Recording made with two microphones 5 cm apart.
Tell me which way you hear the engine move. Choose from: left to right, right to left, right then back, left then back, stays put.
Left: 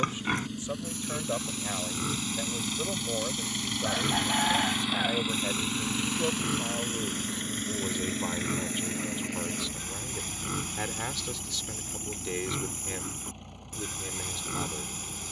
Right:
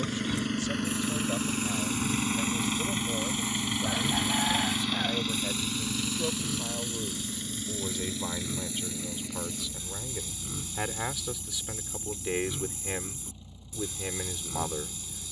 right to left.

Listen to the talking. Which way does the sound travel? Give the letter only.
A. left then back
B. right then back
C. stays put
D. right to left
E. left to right
E.